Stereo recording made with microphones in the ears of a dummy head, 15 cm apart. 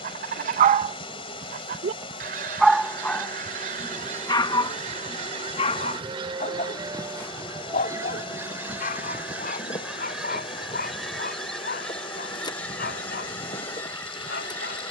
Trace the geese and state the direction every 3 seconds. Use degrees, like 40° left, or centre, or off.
50° right, 40° right, 20° right, centre, 10° left.